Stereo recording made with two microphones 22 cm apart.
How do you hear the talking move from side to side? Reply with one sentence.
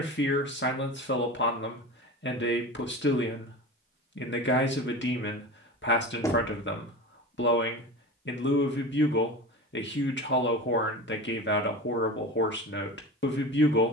In this clip you hear the talking stay put.